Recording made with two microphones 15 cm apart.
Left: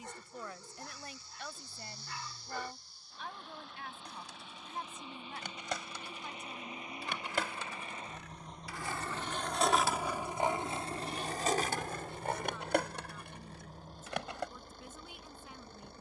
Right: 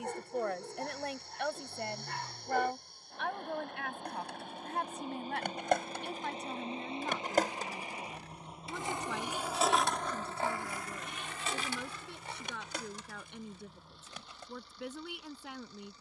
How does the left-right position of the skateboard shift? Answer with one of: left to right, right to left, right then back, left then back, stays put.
right to left.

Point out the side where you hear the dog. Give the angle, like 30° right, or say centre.
60° right.